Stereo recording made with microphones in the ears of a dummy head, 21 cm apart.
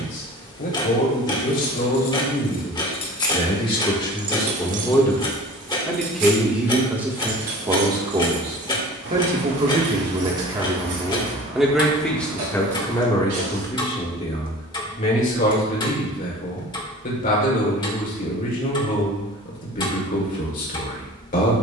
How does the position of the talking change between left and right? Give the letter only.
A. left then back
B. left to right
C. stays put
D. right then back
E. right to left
D.